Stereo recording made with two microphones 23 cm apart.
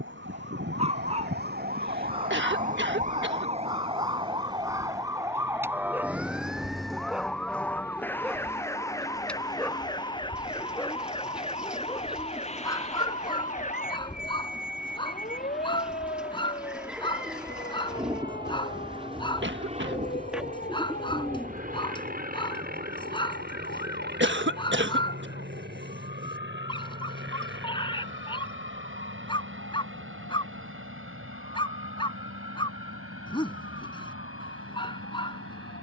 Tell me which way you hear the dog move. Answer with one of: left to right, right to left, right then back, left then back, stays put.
right to left.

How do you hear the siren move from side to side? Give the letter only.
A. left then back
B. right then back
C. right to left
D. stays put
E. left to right
C.